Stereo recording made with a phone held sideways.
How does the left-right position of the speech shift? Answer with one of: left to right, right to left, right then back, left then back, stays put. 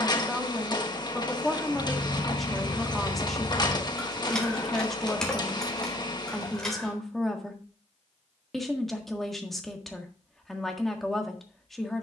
stays put.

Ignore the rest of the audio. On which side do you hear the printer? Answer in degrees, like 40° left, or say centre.
30° left.